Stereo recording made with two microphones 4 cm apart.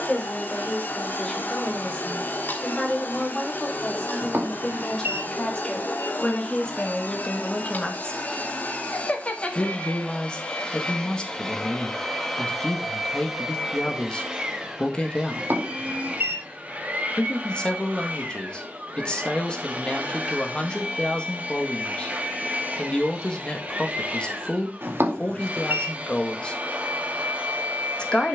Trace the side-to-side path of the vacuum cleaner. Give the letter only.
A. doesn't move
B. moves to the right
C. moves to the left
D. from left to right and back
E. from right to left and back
B.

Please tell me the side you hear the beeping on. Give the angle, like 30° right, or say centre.
60° right.